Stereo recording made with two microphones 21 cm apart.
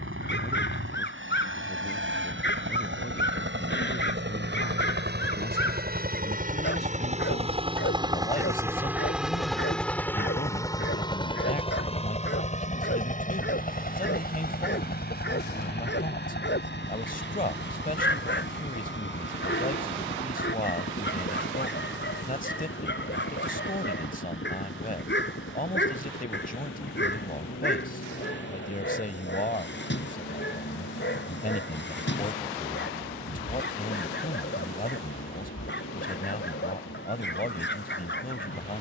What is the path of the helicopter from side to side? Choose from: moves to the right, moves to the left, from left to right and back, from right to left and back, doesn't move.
moves to the left.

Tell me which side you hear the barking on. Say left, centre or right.
left.